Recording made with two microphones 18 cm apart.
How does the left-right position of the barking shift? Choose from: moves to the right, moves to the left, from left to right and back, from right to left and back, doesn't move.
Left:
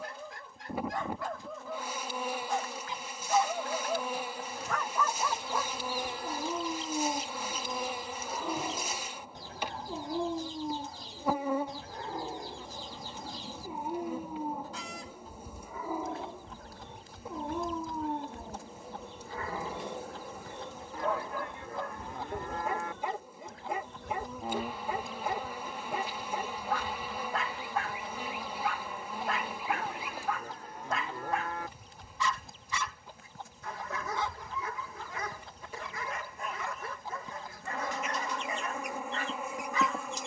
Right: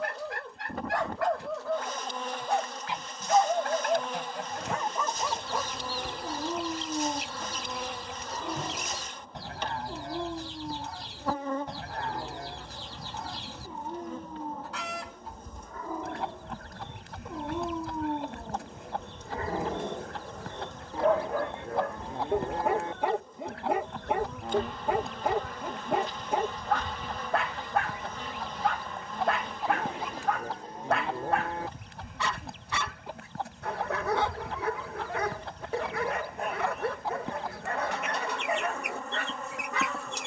from right to left and back.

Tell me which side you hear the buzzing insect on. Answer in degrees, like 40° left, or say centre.
10° left.